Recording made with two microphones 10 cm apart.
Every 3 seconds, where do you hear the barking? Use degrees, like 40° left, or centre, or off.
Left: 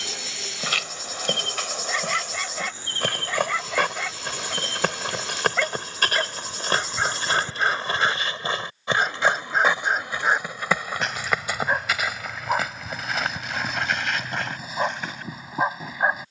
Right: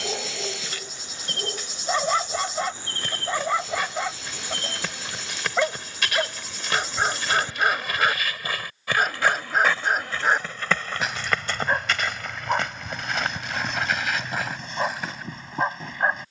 30° right, 20° right, 10° right, centre, centre, 10° left.